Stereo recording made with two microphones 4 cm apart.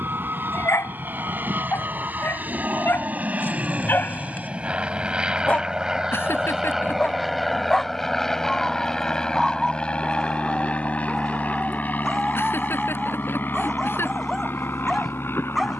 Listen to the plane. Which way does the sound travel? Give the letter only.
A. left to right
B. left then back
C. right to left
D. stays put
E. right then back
C.